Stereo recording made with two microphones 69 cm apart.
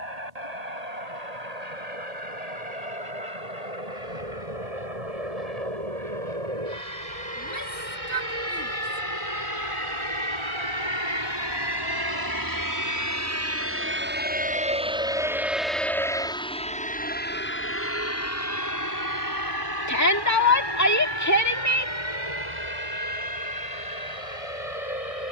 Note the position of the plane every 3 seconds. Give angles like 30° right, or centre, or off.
80° right, 70° right, 60° right, 40° right, 20° right, 10° left, 30° left, 40° left, 50° left.